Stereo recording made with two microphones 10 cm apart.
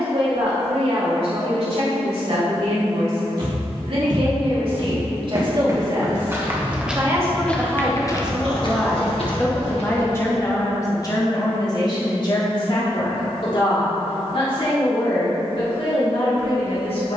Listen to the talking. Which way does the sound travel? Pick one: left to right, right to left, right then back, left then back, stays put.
right to left.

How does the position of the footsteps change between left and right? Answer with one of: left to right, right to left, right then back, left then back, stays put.
right to left.